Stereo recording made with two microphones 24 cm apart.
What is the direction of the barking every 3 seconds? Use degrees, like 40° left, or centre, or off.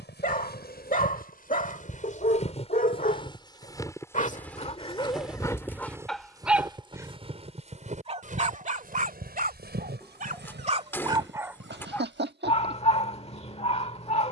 30° left, 20° left, 20° right, 30° right, 30° left.